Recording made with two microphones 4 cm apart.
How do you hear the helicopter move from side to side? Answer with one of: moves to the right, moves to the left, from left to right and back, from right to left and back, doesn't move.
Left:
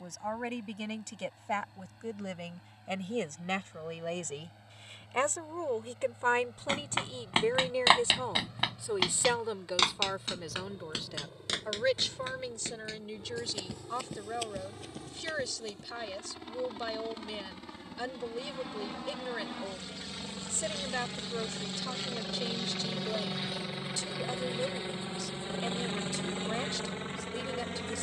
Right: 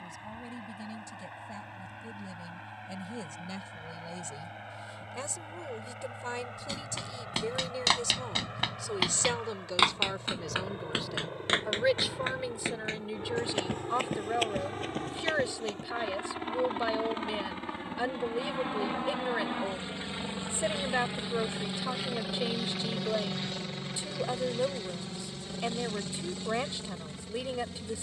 moves to the left.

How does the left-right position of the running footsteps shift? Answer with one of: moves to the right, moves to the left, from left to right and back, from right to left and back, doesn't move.
moves to the right.